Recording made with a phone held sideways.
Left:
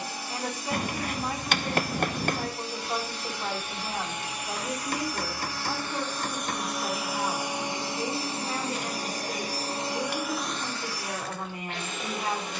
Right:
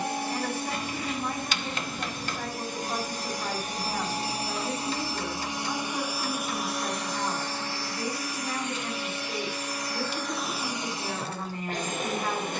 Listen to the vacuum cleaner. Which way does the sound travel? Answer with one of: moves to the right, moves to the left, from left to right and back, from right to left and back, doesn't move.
from right to left and back.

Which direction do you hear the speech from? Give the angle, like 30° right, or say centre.
10° left.